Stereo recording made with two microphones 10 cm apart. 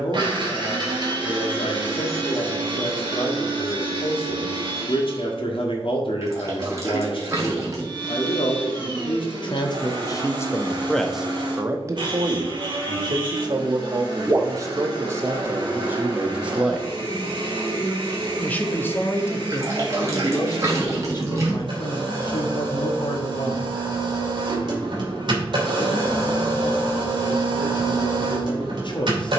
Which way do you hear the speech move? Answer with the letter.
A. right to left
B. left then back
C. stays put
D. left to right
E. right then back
E.